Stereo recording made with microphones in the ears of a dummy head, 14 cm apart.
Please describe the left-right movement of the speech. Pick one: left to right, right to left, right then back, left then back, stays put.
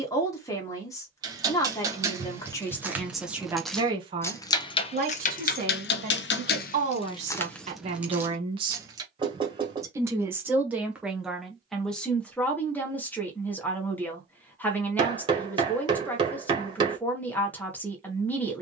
right then back.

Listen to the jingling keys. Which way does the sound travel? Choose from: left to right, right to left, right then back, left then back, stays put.
left then back.